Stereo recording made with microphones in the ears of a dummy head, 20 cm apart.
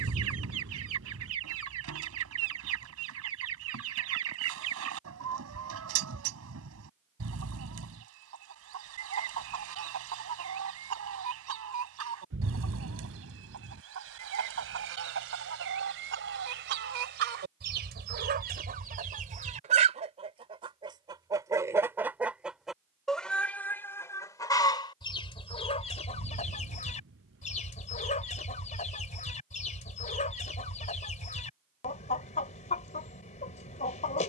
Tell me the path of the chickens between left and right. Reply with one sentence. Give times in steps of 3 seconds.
You can hear the chickens on the right from 0 s, in the centre from 21 s and on the left from 24 s.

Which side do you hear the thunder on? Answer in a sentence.
In this clip you hear the thunder on the right.